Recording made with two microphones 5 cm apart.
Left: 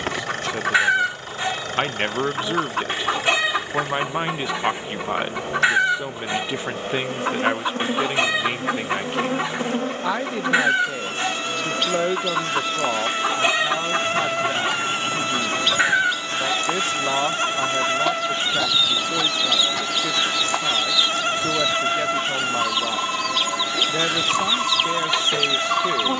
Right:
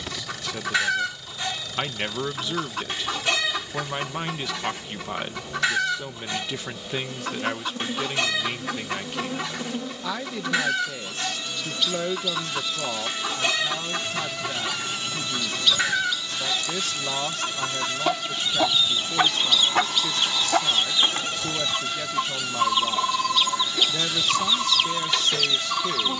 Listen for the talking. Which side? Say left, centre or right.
left.